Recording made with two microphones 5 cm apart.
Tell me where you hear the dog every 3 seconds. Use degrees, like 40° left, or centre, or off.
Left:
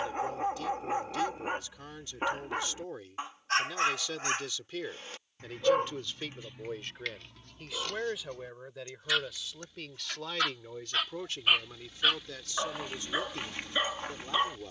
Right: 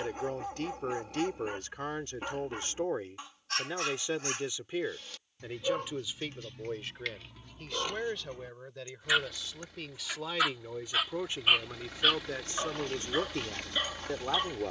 40° left, 40° left, centre, 10° right, 20° left.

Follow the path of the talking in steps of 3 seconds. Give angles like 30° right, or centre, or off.
50° right, 20° right, centre, 10° right, 40° right.